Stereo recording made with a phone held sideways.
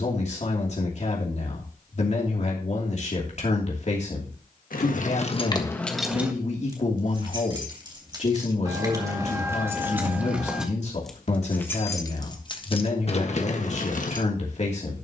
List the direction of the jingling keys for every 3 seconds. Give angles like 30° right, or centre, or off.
off, 40° left, 30° right, centre, 50° left.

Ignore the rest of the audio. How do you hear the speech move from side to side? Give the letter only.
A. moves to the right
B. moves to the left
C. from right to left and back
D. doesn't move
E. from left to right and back
D.